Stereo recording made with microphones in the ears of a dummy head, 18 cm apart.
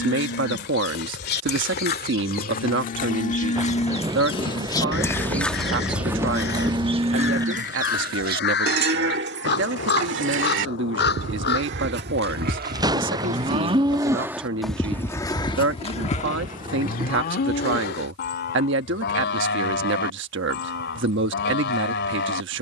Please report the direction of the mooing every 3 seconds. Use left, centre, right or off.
left, left, right, right, right, left, left, left.